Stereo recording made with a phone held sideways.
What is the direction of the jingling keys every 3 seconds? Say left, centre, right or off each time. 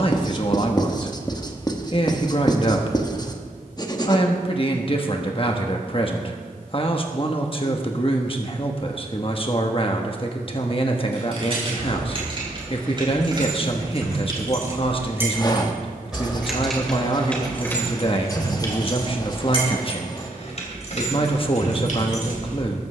off, off, off, right, right, centre, left, left.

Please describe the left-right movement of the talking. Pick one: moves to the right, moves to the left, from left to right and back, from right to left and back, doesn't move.
doesn't move.